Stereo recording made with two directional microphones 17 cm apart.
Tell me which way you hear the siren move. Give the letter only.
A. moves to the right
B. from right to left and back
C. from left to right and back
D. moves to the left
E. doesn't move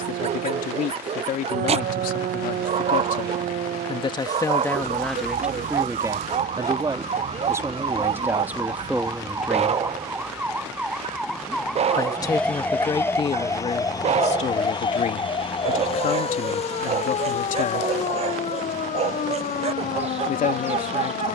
D.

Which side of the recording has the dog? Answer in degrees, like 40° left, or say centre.
40° right.